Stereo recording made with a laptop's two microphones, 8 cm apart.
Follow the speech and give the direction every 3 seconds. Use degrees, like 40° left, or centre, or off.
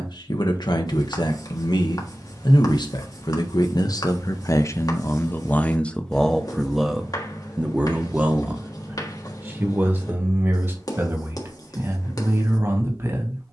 70° left, 40° left, 10° right, 30° right, 40° right.